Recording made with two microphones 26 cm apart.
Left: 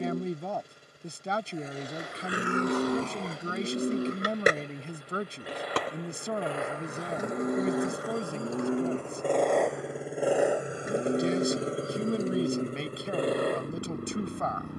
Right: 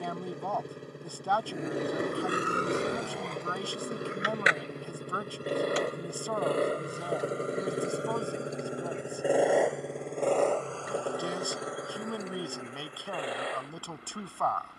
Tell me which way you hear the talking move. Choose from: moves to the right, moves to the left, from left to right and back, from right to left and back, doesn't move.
doesn't move.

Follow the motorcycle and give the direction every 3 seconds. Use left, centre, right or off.
right, right, right, centre, left.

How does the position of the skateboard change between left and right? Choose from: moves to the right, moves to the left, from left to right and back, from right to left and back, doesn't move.
moves to the left.